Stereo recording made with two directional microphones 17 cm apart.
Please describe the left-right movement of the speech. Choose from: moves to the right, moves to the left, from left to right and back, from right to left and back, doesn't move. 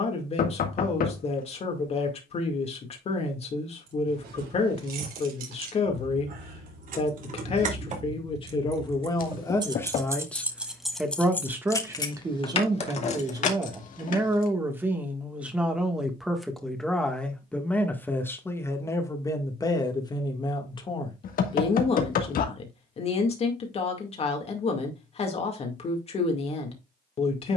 from left to right and back.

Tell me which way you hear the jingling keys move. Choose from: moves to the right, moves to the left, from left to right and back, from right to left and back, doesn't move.
moves to the left.